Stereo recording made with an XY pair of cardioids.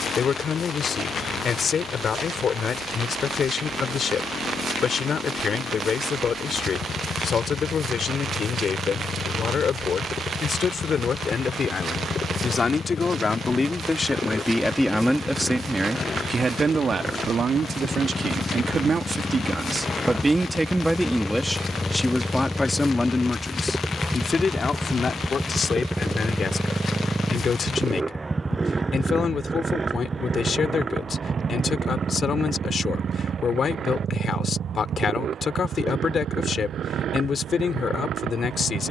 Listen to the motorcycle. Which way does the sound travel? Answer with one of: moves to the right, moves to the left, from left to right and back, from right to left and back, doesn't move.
moves to the right.